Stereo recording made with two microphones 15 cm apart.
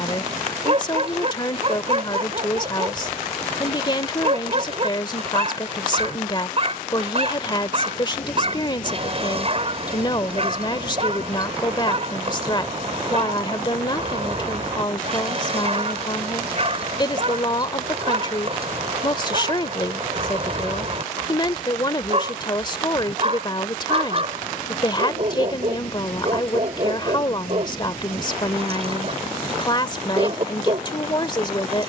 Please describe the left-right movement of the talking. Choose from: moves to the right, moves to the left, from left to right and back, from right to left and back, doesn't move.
doesn't move.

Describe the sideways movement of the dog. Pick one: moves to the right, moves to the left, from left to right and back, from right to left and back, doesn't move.
doesn't move.